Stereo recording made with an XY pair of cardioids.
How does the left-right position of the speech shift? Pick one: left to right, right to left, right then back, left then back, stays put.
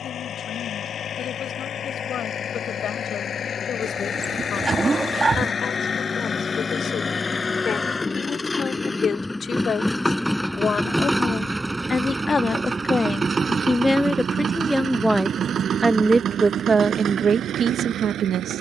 left to right.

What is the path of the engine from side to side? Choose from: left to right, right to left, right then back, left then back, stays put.
left to right.